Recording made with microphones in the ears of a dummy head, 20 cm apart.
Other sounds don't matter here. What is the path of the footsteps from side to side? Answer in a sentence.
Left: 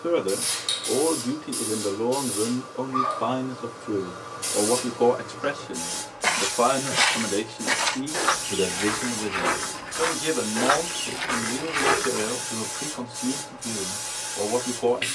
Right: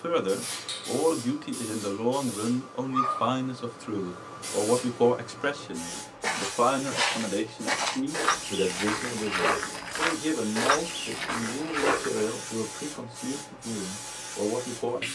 You can hear the footsteps go right and come back.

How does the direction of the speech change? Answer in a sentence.
In this clip you hear the speech move from right to left.